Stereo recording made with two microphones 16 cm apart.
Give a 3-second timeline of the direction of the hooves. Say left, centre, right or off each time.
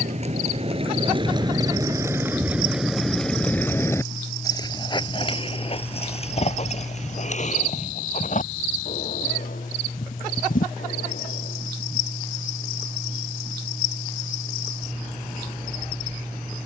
right, left, left, left, off, off.